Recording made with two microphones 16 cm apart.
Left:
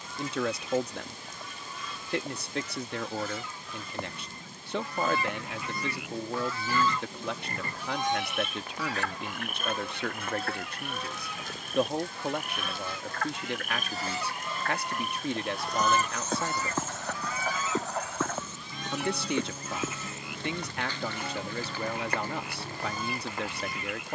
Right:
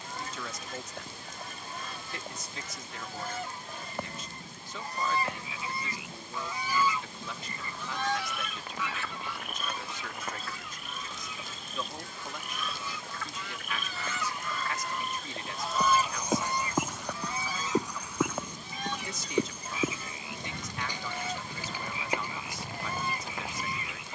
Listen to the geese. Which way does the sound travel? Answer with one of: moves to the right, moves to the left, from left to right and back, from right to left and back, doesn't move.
from right to left and back.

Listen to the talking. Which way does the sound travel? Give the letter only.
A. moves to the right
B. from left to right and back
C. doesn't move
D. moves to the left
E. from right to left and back
C.